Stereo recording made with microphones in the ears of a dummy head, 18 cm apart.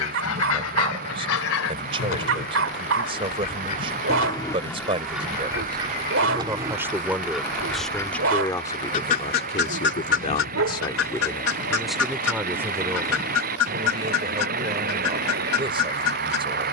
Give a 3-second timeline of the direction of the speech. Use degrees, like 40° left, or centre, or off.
30° right, 20° right, centre, 20° left, 20° right, 20° right.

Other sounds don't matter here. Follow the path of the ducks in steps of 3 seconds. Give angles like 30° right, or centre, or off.
70° left, 10° left, centre, 60° left, 80° left, 80° left.